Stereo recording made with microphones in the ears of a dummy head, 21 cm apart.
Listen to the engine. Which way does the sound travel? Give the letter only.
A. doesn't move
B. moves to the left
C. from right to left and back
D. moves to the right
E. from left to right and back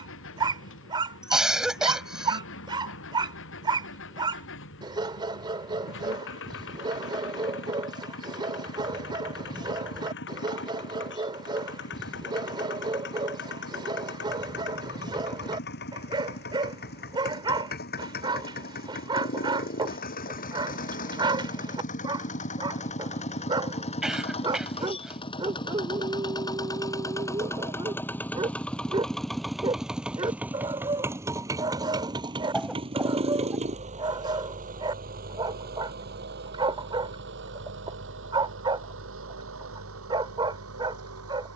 D.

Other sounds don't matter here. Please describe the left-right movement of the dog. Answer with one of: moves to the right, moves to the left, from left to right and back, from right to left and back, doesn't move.
doesn't move.